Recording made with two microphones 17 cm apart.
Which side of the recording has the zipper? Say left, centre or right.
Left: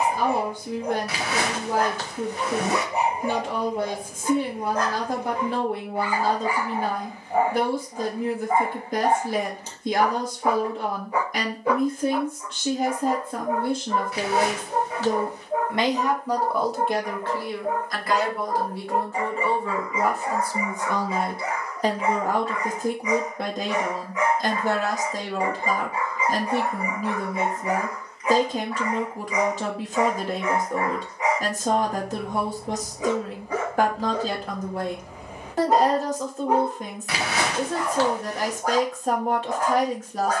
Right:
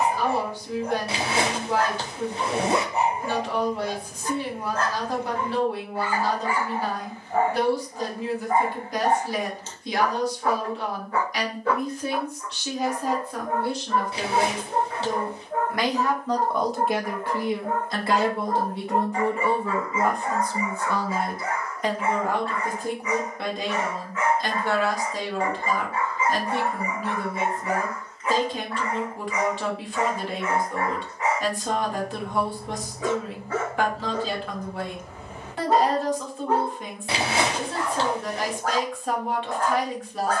right.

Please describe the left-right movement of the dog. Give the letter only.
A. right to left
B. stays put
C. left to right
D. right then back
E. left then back
B.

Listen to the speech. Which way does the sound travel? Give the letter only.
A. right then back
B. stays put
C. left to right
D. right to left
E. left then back
A.